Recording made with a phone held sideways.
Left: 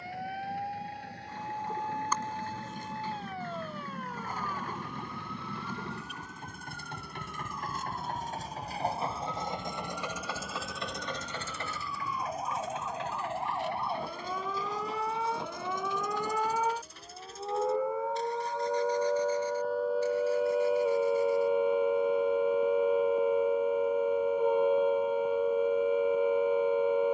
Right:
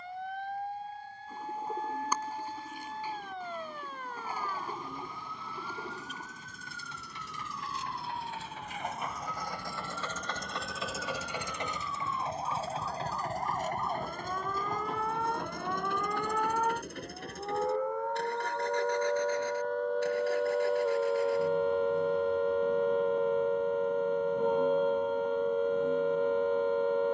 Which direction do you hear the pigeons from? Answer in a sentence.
You can hear the pigeons in the centre.